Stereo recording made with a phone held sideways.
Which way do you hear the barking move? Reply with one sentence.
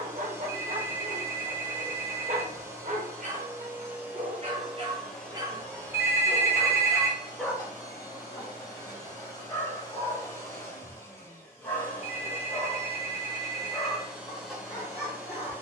You can hear the barking travel towards the left.